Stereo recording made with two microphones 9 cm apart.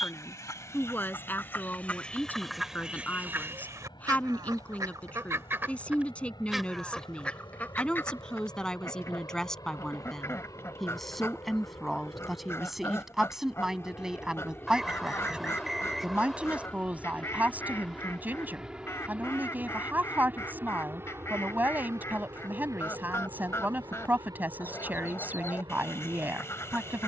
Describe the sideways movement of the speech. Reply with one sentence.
In this clip you hear the speech go from the left side to the right.